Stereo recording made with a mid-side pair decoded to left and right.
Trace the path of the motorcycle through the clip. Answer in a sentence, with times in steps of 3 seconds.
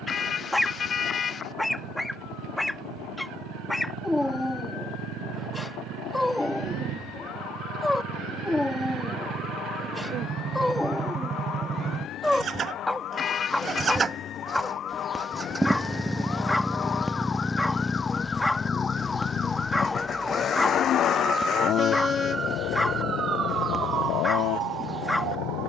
You can hear the motorcycle on the right from 0 s, in the centre from 15 s and on the left from 18 s.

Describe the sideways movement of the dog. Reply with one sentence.
You can hear the dog stay in one place.